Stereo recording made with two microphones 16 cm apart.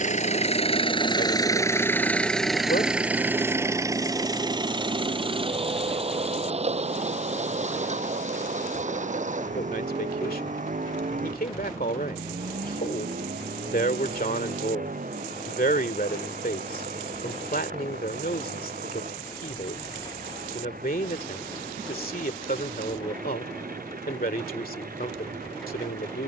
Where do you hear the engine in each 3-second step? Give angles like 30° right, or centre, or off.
20° left, 20° right, 40° right, 50° right, 60° right, 60° right, 60° right, 60° right, 60° right.